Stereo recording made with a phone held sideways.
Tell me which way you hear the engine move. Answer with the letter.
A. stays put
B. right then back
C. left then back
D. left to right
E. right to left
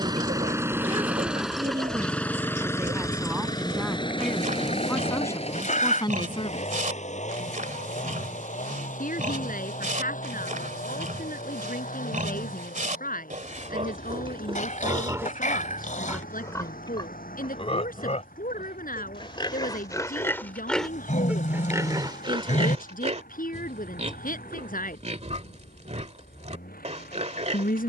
E.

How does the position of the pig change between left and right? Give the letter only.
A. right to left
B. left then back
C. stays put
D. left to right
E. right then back
B.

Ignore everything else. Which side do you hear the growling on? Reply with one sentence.
You can hear the growling on the left.